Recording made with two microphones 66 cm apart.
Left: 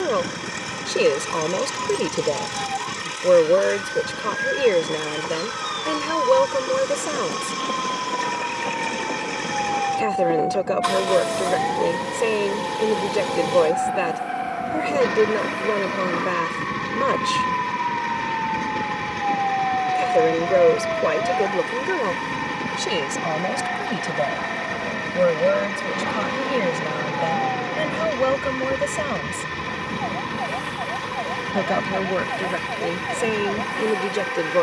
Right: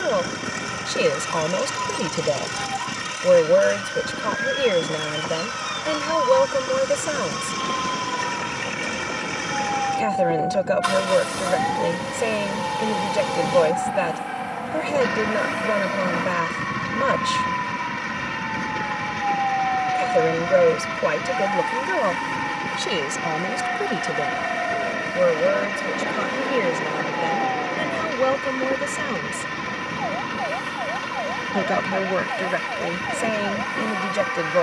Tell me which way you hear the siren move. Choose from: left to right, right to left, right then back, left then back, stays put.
right to left.